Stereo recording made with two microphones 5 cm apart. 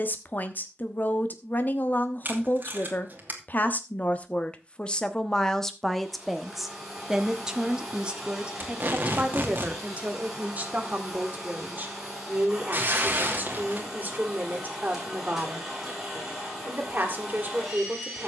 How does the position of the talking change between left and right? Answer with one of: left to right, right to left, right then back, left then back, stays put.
left to right.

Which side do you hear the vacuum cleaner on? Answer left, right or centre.
centre.